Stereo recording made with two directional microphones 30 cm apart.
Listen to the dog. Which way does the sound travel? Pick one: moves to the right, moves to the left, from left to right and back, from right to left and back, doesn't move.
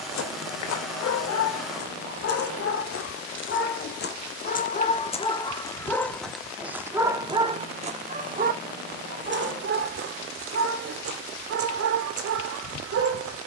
moves to the right.